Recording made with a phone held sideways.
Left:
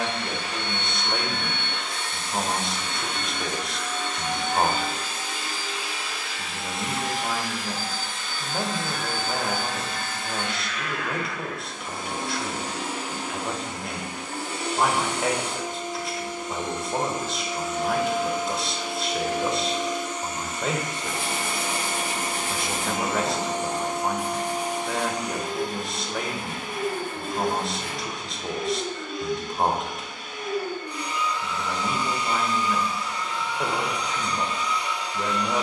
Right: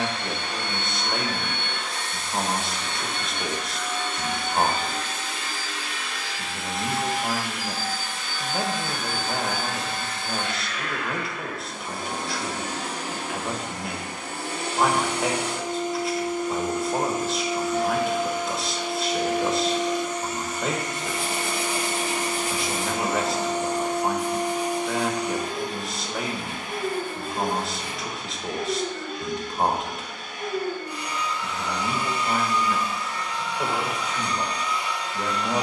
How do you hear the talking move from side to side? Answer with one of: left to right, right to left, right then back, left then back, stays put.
stays put.